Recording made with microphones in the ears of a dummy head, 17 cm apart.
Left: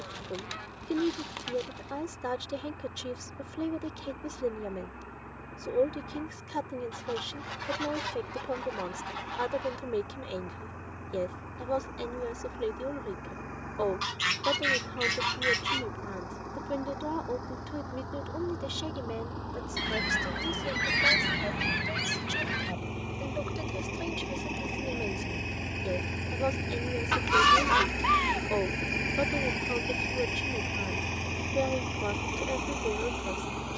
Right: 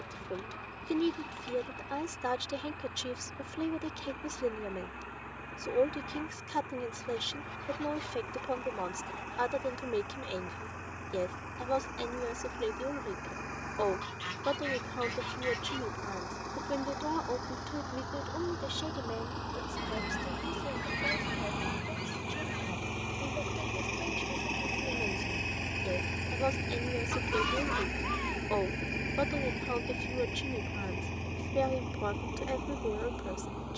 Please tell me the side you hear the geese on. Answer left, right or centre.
left.